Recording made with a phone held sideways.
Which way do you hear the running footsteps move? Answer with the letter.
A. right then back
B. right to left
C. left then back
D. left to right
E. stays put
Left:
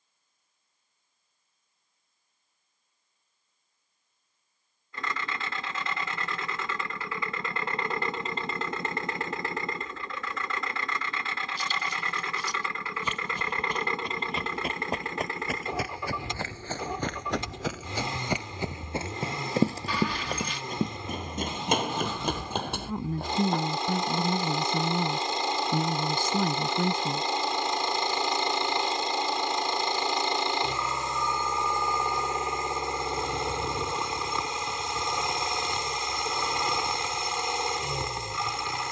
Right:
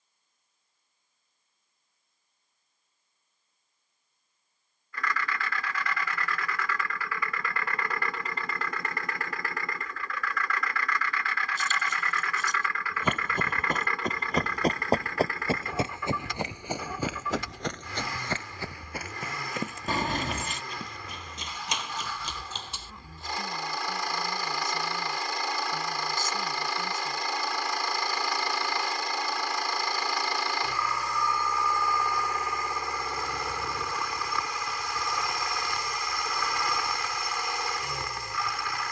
B.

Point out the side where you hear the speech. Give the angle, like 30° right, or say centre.
70° left.